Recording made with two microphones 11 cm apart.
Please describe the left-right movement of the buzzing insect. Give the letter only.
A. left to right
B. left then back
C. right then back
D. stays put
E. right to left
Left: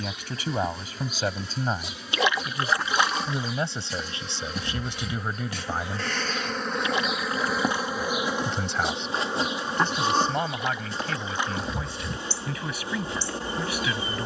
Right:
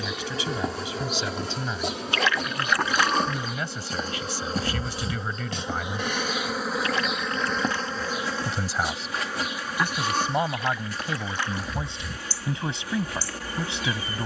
E.